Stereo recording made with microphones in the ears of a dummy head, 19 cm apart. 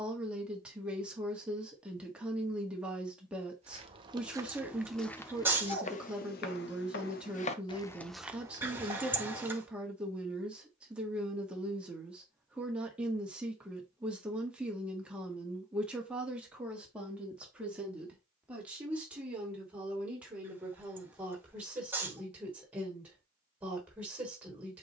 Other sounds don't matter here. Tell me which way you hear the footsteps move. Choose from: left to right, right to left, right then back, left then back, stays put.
left then back.